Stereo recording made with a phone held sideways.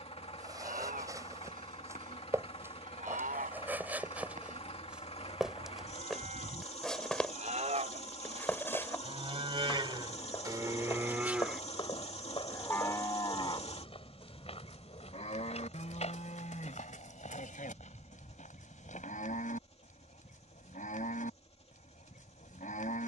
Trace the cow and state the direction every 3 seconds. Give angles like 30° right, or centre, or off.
70° right, 70° right, 60° right, 30° right, 30° left, 60° left, 70° left, 70° left.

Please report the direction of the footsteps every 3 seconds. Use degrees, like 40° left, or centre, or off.
20° right, 10° right, 10° left, 30° left, 40° left, 50° left, 60° left, off.